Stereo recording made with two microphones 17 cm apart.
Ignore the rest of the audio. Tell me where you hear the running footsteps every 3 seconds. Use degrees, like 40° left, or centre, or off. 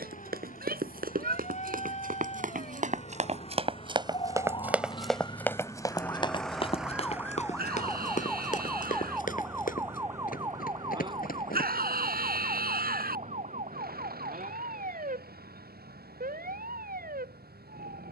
70° right, 20° right, 50° left, 60° left, off, off.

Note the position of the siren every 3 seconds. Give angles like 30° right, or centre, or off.
50° left, 30° left, 10° left, 20° right, 50° right, 60° right.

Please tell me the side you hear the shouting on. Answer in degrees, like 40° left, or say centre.
80° right.